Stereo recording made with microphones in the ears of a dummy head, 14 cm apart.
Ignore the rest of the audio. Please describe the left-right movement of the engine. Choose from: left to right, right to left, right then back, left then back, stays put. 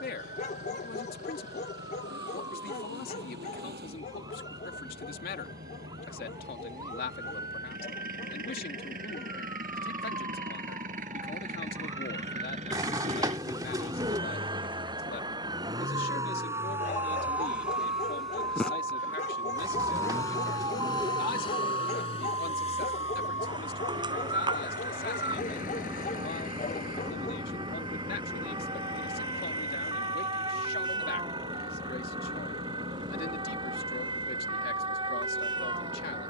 right to left.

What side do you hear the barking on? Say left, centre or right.
left.